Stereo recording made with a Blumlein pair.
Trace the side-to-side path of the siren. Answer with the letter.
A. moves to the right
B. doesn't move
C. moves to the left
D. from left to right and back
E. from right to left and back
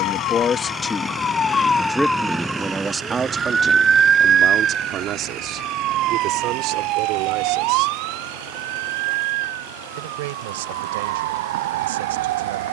A.